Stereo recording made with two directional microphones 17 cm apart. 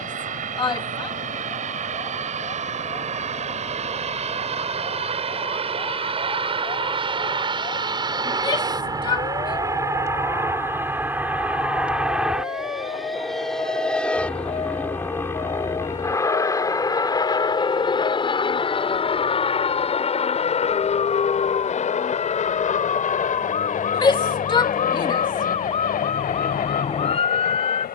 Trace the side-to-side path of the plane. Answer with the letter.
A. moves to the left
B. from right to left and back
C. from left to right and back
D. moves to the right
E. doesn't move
A.